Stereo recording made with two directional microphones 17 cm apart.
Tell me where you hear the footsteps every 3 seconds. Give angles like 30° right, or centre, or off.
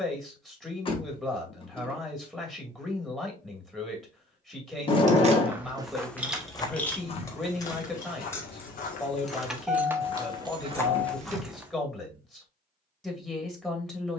off, 10° right, 40° left, 20° left, off.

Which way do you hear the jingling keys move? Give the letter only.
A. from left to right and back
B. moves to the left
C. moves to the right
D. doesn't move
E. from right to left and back
E.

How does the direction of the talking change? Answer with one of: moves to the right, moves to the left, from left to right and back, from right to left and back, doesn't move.
doesn't move.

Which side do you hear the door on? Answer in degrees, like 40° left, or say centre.
30° left.